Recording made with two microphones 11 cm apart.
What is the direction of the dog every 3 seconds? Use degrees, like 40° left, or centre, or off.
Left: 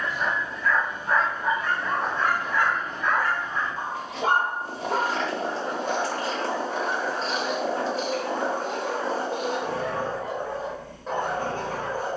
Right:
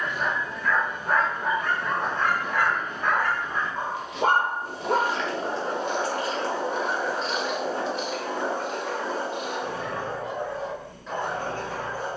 60° right, 50° right, centre, 40° left.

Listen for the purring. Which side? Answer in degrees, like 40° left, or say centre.
40° left.